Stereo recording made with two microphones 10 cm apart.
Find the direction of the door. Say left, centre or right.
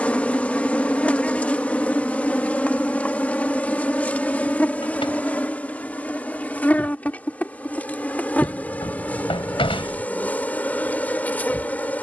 left.